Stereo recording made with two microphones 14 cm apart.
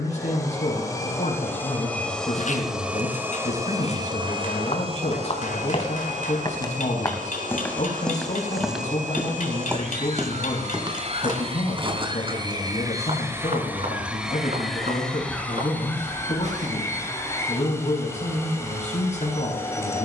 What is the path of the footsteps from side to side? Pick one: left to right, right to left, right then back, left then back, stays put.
left to right.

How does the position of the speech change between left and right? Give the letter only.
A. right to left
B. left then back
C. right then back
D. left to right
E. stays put
E.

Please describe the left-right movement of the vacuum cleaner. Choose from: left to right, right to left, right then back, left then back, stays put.
right then back.